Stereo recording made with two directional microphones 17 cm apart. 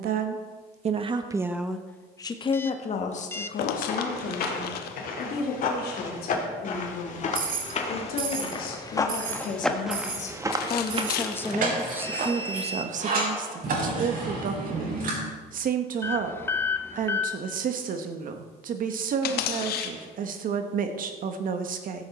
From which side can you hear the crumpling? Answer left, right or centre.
left.